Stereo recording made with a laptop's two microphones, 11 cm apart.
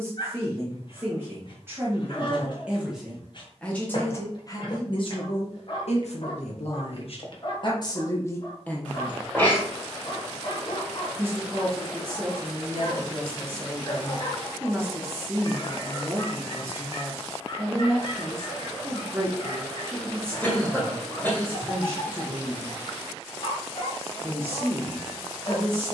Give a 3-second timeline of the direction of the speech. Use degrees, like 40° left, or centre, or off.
20° right, 30° left, 50° left, 10° right, 20° right, 20° right, 20° right, 20° right, 20° right.